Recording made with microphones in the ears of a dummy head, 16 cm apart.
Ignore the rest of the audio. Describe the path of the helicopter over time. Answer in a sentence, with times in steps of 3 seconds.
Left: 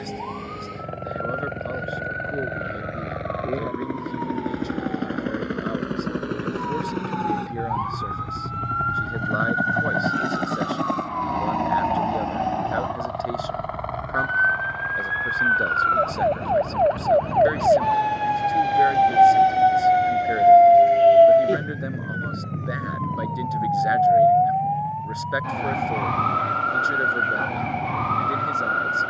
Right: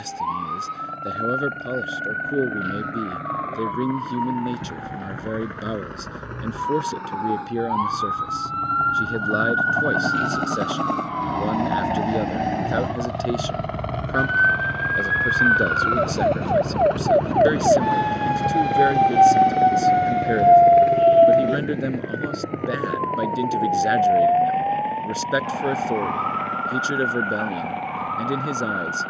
You can hear the helicopter on the left from 0 s, in the centre from 9 s and on the right from 12 s.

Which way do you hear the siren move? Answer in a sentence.
You can hear the siren move to the left.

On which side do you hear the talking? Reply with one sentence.
In this clip you hear the talking on the right.